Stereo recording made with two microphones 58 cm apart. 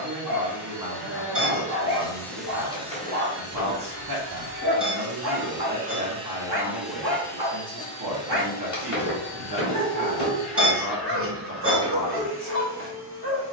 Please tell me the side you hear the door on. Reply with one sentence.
In this clip you hear the door on the left.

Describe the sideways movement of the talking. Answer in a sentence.
You can hear the talking stay put.